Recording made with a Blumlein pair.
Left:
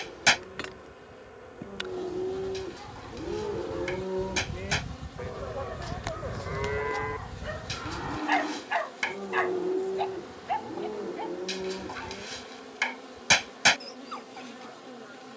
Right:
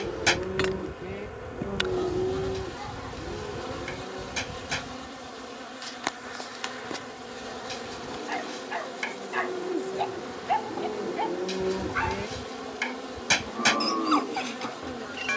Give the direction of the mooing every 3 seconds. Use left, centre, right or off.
right, left, left, centre, right.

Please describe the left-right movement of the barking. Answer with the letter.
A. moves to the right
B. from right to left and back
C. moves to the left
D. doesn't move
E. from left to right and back
B.